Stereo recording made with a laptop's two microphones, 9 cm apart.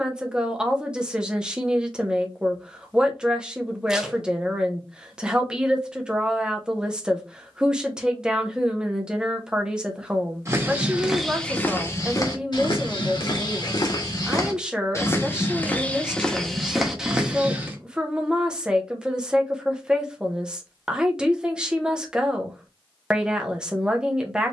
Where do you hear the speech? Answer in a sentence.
You can hear the speech in the centre.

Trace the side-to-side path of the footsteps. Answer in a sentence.
In this clip you hear the footsteps go left and come back.